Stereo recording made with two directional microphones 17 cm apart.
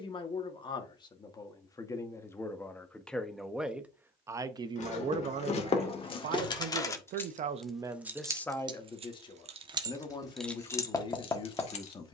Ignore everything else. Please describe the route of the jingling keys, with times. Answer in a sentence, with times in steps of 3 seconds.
In this clip you hear the jingling keys not at all from 0 s, on the left from 3 s and in the centre from 6 s.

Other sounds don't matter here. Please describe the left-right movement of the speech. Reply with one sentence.
You can hear the speech move from left to right and back again.